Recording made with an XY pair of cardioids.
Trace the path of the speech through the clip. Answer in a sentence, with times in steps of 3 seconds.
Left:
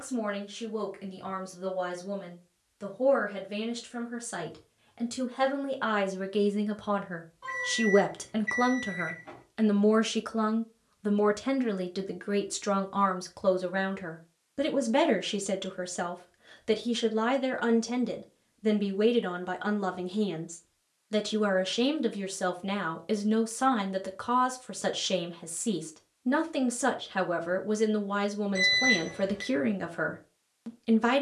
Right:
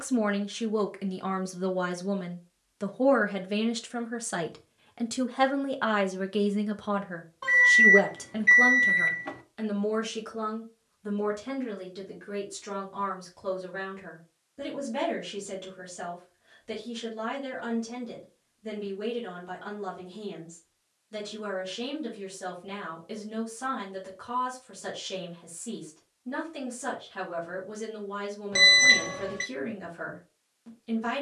You can hear the speech on the right from 0 s, in the centre from 6 s and on the left from 9 s.